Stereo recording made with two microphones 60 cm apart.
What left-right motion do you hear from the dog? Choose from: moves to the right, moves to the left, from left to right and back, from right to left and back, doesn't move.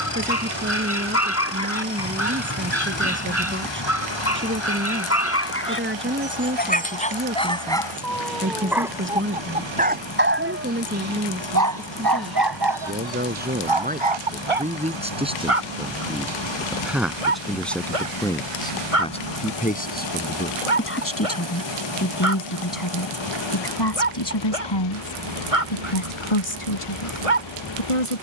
moves to the right.